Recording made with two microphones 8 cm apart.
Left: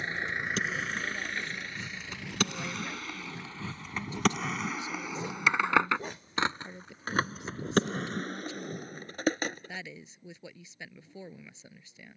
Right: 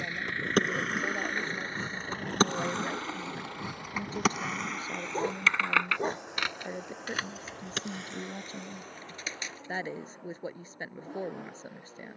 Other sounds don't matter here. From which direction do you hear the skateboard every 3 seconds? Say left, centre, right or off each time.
right, centre, left, left.